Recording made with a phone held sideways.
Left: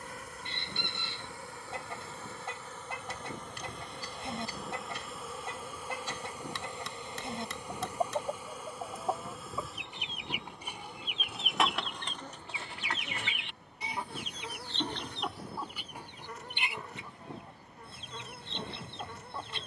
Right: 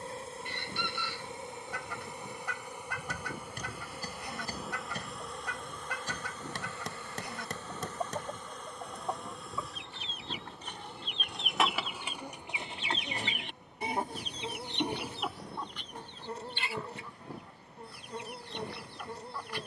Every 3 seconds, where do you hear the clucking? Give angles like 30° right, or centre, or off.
30° left, 30° left, 30° left, 10° left, 30° right, 10° left, 30° left.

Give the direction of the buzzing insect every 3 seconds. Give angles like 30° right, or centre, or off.
20° right, centre, 10° left, centre, 20° right, 30° right, 30° right.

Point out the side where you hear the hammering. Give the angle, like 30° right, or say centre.
50° right.